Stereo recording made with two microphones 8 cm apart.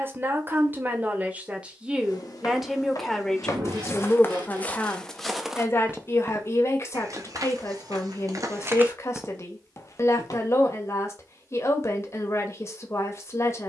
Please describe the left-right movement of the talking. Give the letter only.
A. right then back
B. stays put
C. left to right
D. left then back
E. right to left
E.